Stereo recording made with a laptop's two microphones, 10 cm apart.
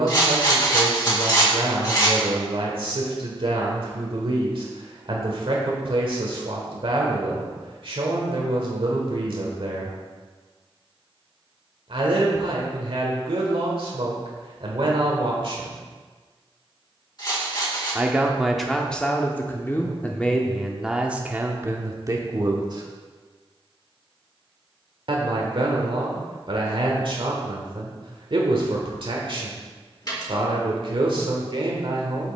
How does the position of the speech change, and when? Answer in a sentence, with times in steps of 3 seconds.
You can hear the speech on the right from 0 s, in the centre from 18 s and on the right from 21 s.